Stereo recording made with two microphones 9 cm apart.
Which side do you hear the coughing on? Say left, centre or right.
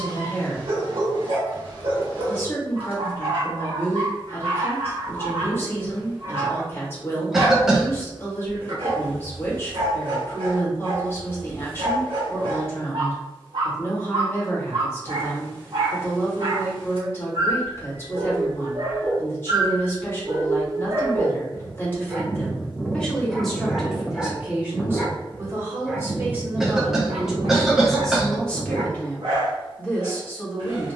centre.